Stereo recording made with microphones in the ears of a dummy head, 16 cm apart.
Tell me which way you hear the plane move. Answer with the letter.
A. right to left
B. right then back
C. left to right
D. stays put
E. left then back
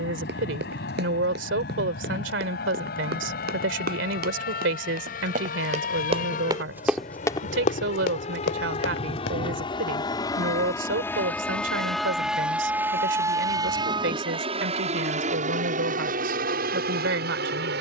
C.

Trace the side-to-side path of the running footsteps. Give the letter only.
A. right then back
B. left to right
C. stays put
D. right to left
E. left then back
D.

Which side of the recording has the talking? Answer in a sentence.
In this clip you hear the talking on the right.